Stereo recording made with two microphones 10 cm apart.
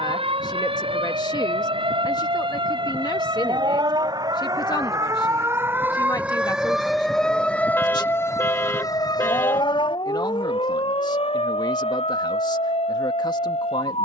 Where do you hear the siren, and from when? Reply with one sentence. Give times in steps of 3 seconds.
You can hear the siren on the right from 0 s, in the centre from 6 s and on the left from 9 s.